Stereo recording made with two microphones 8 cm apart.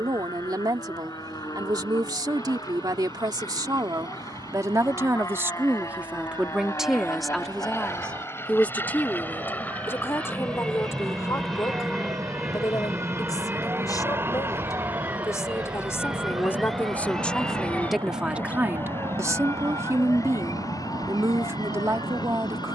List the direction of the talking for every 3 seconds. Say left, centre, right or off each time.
right, right, centre, left, left, left, right, right.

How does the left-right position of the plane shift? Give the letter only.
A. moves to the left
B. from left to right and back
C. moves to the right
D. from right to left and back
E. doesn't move
C.